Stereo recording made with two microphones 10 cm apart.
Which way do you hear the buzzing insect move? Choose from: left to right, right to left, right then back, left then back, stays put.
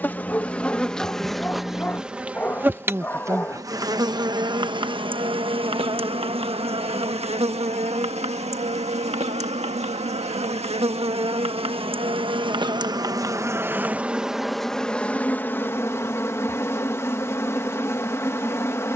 right then back.